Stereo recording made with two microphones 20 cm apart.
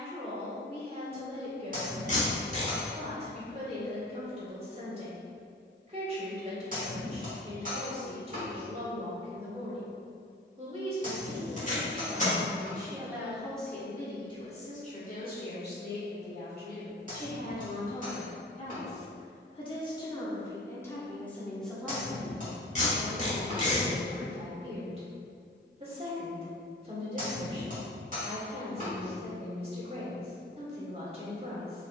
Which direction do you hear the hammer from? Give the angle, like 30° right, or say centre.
40° right.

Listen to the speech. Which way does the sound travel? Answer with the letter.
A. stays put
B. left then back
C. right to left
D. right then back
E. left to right
B.